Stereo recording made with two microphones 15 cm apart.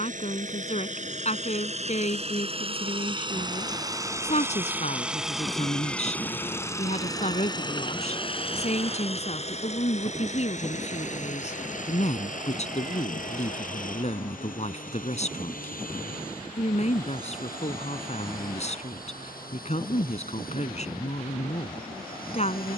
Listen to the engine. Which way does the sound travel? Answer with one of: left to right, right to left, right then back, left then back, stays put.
right to left.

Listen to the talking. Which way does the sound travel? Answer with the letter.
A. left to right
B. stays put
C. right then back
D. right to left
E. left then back
B.